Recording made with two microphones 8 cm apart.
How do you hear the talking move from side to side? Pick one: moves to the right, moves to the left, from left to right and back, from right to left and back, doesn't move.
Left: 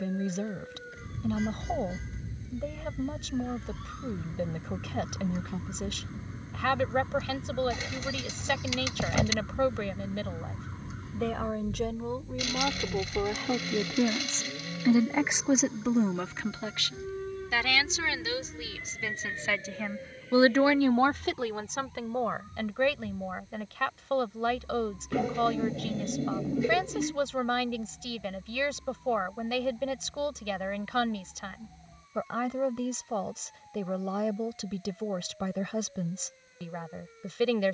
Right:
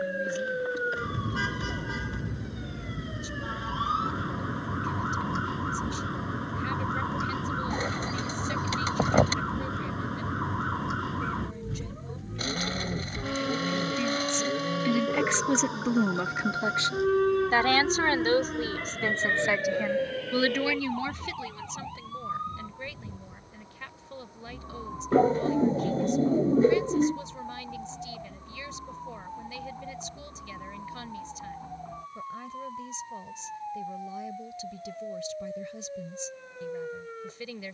from left to right and back.